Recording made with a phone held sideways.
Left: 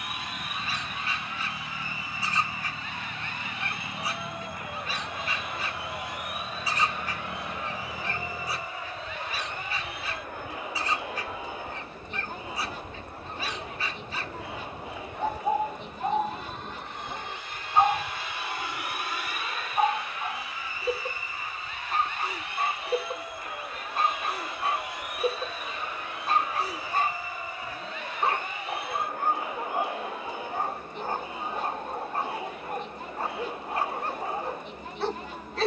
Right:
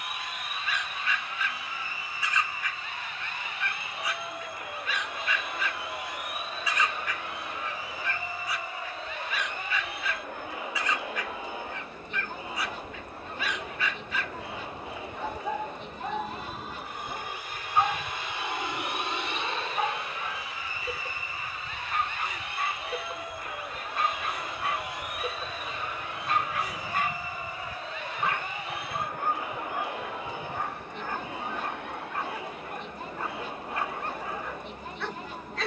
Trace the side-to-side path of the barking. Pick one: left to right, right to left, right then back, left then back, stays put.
stays put.